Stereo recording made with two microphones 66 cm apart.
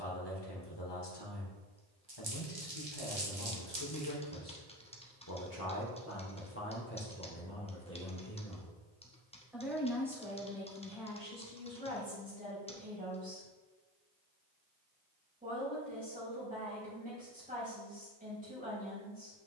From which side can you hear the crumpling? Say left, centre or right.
right.